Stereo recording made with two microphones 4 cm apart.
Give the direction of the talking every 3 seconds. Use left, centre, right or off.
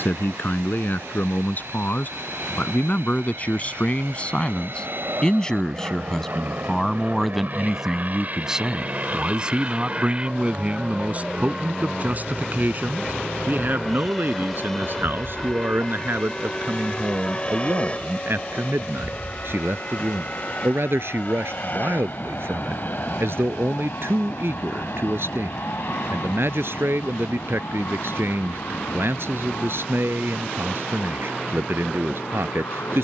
left, left, centre, right, right, right, right, right, right, right, right.